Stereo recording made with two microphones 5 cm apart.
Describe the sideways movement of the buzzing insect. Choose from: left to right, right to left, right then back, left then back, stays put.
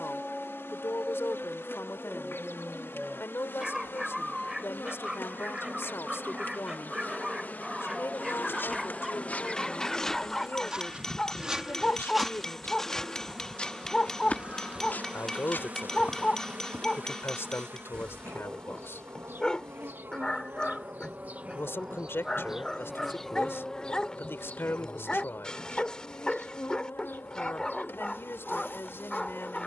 right then back.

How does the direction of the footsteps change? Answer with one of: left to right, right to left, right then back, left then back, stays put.
right then back.